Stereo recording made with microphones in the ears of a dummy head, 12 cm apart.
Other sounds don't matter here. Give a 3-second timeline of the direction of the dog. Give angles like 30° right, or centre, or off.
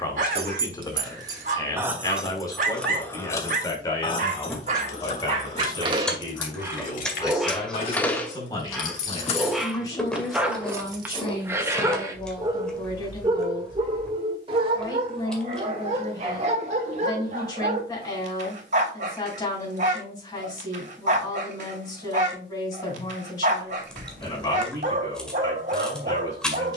60° right, 50° right, centre, 10° right, 30° right, 50° right, 60° right, 60° right, 60° right.